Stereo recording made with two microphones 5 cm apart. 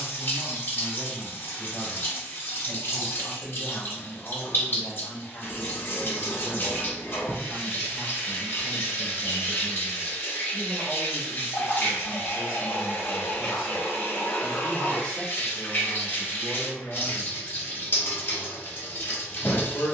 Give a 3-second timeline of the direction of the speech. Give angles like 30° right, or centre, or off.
60° left, 50° left, 10° left, 20° right, 10° right, 30° left, 50° left.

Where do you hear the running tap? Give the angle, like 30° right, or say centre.
40° left.